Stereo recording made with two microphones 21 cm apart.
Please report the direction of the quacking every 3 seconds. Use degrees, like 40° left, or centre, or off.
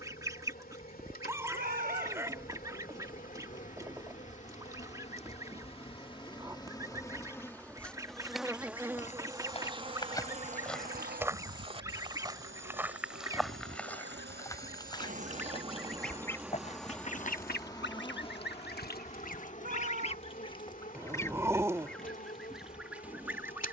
20° right, 20° right, 20° right, 20° right, 20° right, 30° left, 40° left, centre.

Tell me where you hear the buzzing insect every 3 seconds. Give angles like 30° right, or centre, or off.
40° left, 30° left, 10° left, 30° right, 60° right, 10° right, 30° left, 40° left.